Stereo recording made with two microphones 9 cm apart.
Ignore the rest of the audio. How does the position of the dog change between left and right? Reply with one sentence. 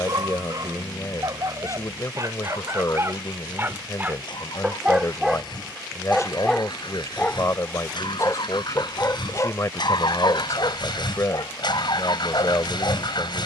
In this clip you hear the dog move from right to left.